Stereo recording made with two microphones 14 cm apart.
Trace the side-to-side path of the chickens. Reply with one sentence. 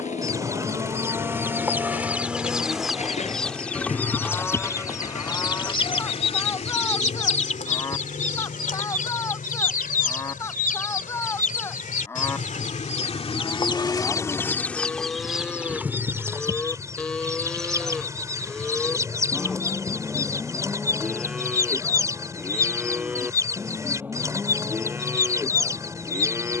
You can hear the chickens move from right to left and back again.